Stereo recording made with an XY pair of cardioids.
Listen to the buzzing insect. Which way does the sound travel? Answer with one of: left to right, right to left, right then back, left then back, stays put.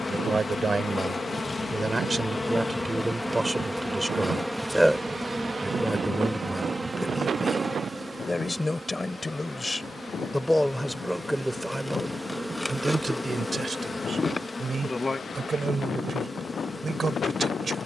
right then back.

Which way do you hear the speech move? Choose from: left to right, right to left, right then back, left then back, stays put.
left then back.